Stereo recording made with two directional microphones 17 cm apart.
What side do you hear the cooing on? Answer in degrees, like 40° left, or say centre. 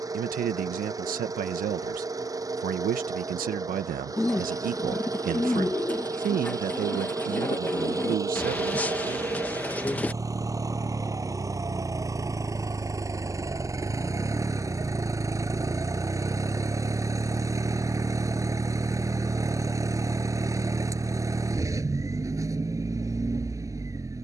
10° left.